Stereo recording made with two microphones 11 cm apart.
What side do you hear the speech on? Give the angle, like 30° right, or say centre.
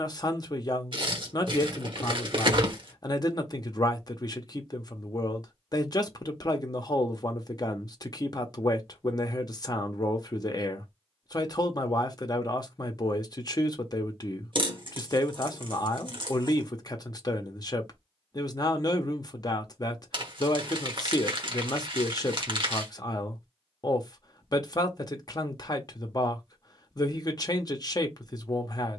40° left.